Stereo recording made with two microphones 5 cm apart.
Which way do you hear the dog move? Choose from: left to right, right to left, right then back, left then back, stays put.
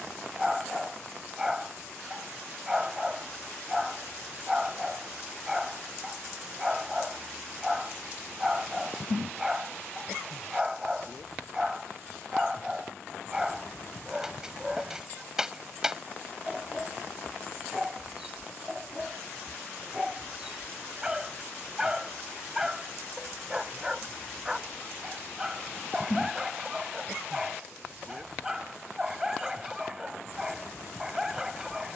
stays put.